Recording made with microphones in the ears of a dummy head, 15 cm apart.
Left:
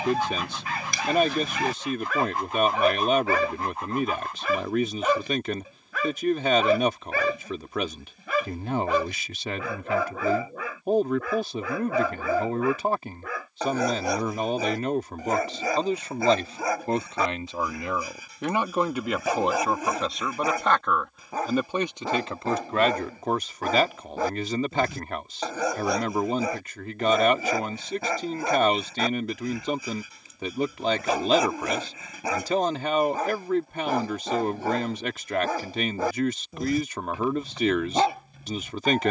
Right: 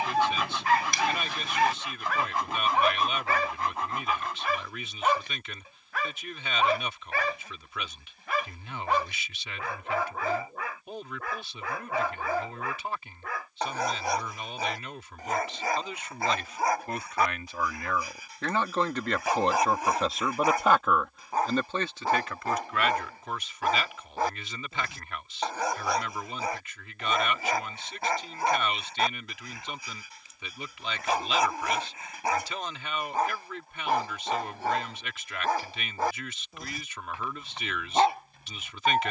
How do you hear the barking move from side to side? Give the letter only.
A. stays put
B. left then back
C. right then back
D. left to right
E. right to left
A.